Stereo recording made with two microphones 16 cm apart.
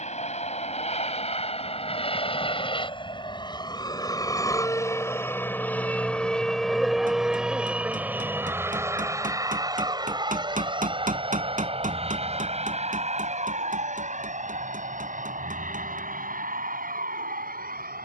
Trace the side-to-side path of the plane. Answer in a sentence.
You can hear the plane move from left to right.